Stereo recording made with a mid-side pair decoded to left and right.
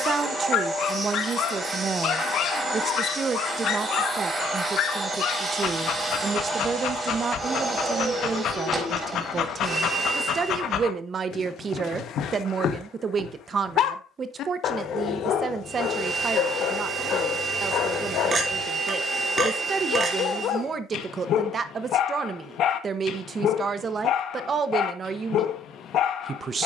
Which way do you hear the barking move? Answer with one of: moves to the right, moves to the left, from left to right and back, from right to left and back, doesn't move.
doesn't move.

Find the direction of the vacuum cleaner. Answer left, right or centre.
right.